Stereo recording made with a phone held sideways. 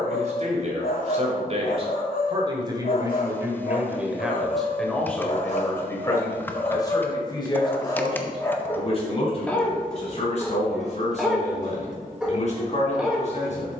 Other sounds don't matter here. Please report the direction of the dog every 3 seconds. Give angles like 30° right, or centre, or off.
70° left, 60° left, 30° left, centre, 10° right.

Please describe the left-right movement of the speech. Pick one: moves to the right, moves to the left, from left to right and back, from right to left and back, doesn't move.
moves to the left.